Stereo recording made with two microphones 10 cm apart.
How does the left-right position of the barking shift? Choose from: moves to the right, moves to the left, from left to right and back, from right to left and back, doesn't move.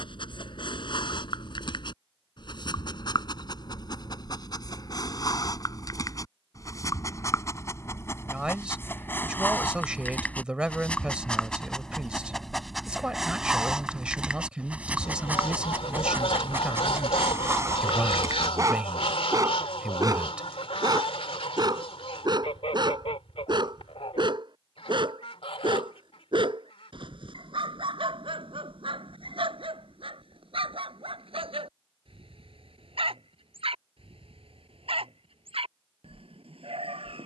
moves to the right.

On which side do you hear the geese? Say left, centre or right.
left.